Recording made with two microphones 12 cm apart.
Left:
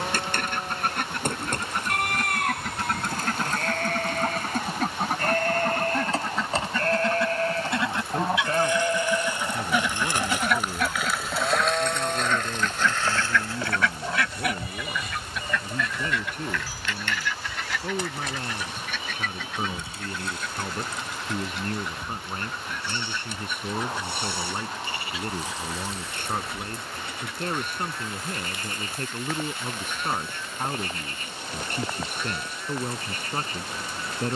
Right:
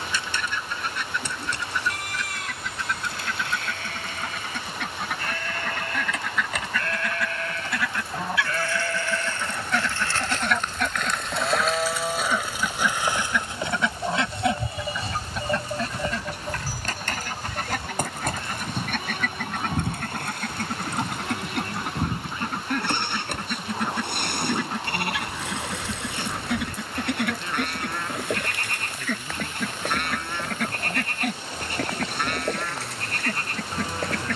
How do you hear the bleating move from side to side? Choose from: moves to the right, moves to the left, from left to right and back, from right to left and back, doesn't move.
moves to the right.